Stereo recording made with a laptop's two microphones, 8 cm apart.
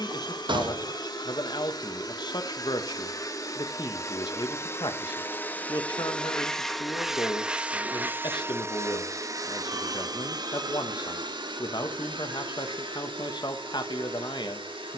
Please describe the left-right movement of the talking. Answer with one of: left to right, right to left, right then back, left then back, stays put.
stays put.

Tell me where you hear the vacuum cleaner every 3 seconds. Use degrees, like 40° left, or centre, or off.
50° left, 30° left, 10° right, 50° right, 70° right.